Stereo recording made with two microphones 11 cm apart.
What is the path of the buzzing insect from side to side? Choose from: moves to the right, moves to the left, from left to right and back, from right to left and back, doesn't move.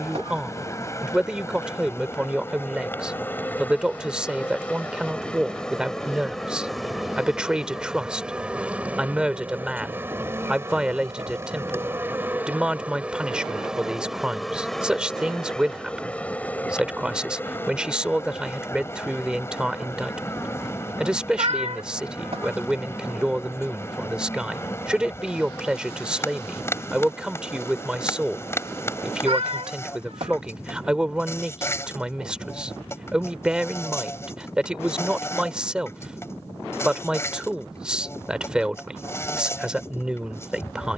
from left to right and back.